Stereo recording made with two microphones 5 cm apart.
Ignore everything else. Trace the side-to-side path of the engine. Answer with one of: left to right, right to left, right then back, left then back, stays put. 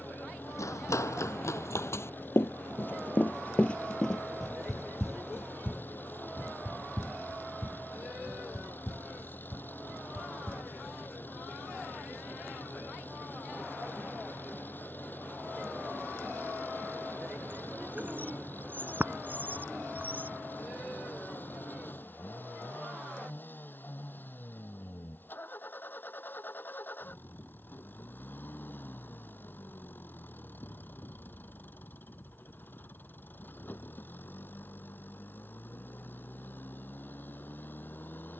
stays put.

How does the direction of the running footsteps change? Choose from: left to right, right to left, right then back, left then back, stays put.
left to right.